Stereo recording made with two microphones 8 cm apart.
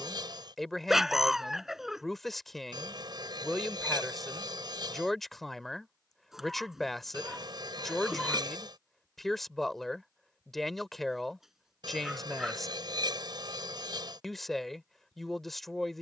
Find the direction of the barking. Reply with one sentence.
In this clip you hear the barking in the centre.